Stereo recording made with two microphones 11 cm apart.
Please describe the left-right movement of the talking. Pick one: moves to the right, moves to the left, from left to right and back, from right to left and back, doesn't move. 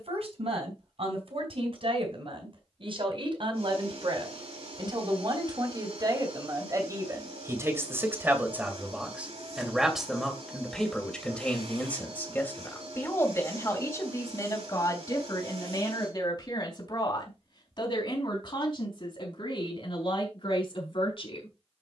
moves to the left.